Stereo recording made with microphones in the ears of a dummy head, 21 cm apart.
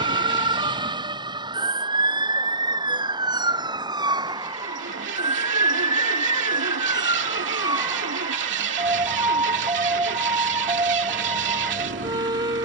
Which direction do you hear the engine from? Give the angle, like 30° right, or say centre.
50° right.